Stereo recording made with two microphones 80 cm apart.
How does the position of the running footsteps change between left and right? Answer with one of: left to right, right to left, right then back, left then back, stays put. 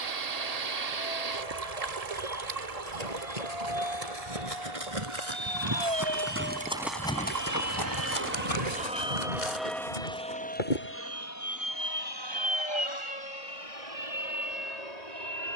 right to left.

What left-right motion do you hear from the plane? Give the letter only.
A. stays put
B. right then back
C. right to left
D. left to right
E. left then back
C.